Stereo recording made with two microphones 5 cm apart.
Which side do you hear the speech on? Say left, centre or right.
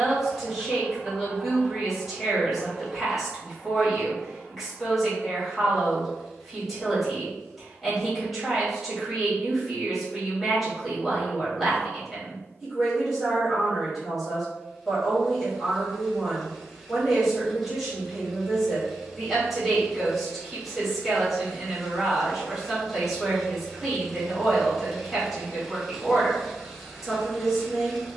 centre.